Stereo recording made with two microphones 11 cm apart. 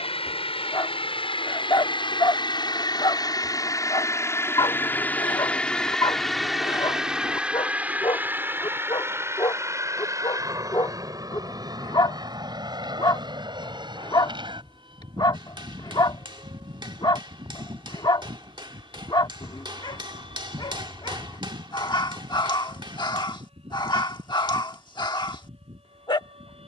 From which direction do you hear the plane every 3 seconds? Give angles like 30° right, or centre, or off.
50° left, 20° left, 10° right, 30° right, 40° right, 50° right, 50° right, 50° right, 60° right.